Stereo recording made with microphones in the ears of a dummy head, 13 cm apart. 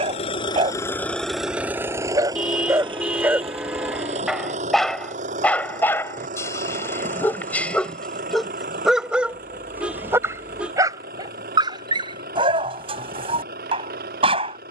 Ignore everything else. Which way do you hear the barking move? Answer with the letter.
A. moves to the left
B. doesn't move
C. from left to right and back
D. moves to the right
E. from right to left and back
E.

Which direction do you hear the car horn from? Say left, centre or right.
centre.